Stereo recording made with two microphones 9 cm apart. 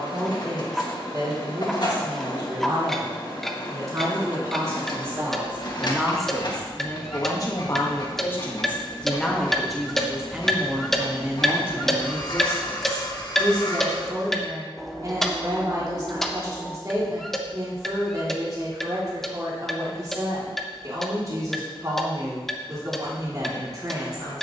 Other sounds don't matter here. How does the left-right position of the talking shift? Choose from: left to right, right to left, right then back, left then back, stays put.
left then back.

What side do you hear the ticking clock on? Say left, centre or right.
centre.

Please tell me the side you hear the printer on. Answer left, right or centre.
left.